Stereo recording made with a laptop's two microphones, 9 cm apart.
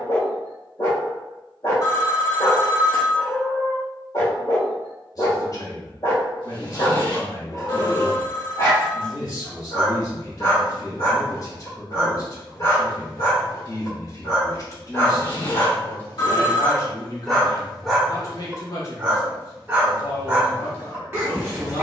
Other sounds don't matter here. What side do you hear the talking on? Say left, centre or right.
left.